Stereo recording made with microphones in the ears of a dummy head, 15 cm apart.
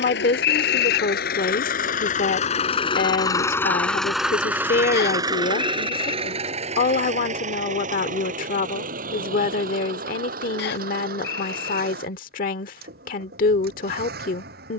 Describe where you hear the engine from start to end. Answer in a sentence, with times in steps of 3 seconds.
In this clip you hear the engine on the left from 0 s, in the centre from 3 s and on the right from 6 s.